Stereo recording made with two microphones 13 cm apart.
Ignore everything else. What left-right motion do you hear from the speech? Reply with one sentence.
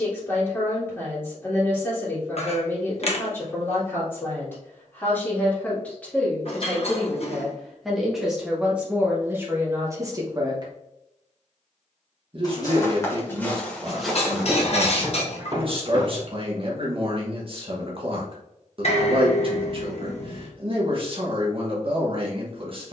In this clip you hear the speech travel towards the right.